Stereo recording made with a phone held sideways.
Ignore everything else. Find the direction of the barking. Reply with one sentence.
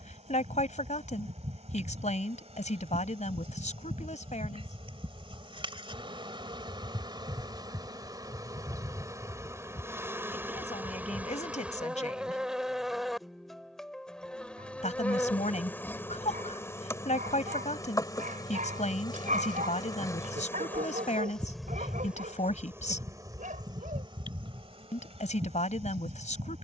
You can hear the barking on the right.